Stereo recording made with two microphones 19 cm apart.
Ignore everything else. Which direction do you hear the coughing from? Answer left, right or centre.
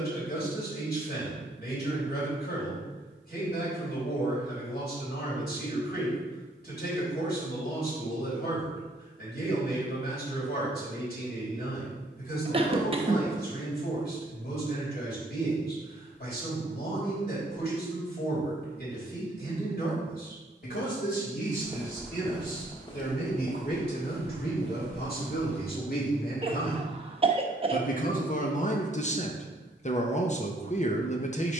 right.